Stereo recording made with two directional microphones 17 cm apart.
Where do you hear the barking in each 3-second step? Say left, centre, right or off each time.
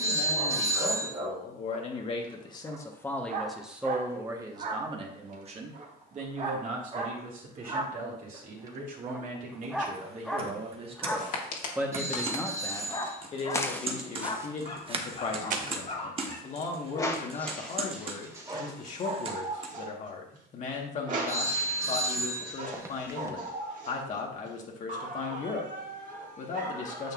right, right, right, centre, left, left, right, right, right.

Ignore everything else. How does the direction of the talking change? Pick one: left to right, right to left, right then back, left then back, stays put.
right then back.